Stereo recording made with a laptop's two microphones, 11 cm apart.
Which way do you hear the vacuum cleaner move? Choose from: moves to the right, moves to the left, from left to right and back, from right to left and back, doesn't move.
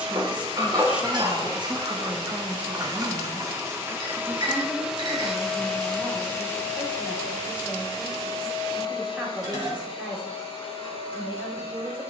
moves to the left.